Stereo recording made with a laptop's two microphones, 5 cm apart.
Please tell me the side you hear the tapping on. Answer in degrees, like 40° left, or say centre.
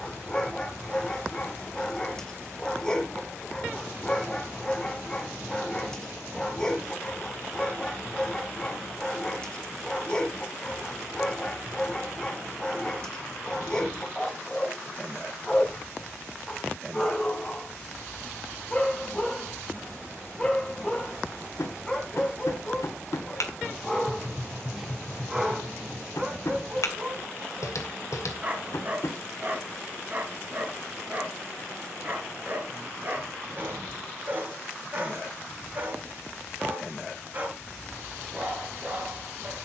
70° left.